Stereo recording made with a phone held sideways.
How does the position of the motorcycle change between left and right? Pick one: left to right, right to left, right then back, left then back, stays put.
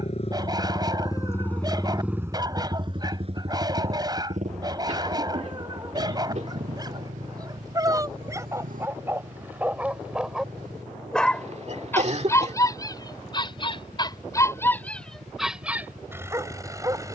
left to right.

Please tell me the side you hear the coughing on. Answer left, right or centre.
right.